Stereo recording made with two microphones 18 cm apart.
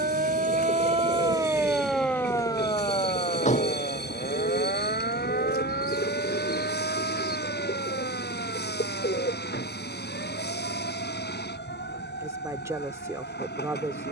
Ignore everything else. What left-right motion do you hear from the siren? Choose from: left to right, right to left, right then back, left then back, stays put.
right to left.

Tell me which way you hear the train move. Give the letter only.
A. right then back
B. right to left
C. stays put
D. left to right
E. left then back
C.